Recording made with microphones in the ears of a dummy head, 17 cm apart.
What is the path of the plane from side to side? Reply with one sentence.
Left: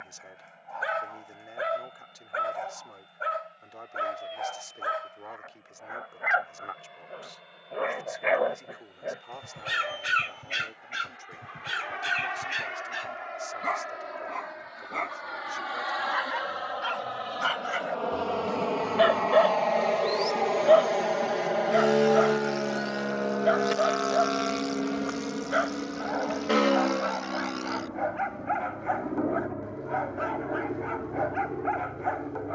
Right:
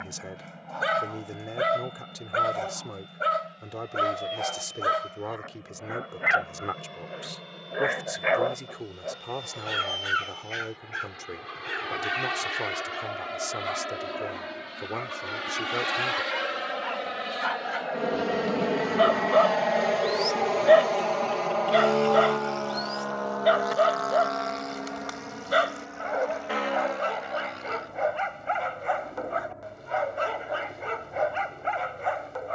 In this clip you hear the plane move from right to left.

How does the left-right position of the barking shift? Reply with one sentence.
In this clip you hear the barking go left and come back.